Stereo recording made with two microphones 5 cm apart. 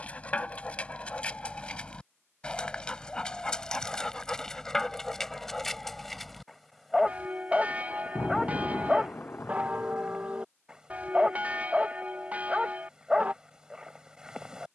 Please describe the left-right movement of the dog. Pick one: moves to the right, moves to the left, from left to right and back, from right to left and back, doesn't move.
moves to the right.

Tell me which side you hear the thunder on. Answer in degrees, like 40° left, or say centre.
40° left.